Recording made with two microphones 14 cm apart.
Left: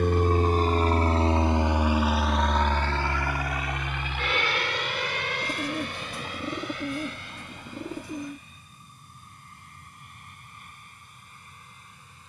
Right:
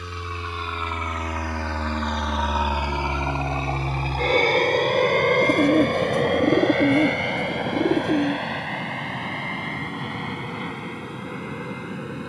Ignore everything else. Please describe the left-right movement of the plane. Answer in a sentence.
In this clip you hear the plane move from left to right.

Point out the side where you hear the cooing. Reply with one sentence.
In this clip you hear the cooing on the right.